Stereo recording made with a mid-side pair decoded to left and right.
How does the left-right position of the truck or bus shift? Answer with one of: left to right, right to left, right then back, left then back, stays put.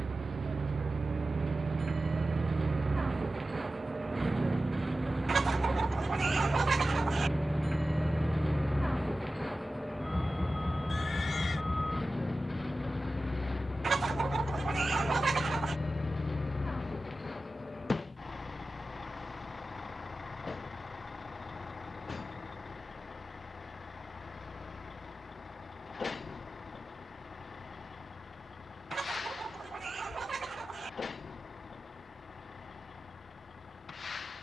right to left.